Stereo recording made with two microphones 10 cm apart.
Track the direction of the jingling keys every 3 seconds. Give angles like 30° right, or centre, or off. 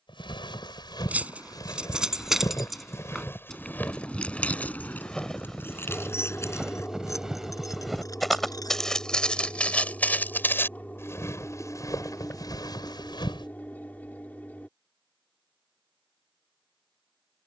10° right, 10° left, 30° left, 40° left, off, off.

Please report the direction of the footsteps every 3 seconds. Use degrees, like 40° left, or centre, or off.
40° left, 10° left, centre, 20° left, 50° left, off.